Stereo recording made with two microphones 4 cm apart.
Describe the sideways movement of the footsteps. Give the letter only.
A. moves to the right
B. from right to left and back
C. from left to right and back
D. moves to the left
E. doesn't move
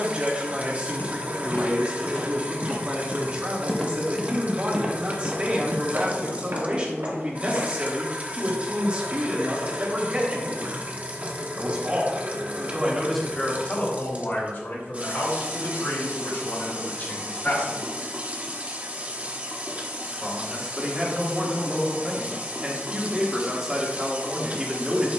A.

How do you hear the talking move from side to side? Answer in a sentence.
In this clip you hear the talking go left and come back.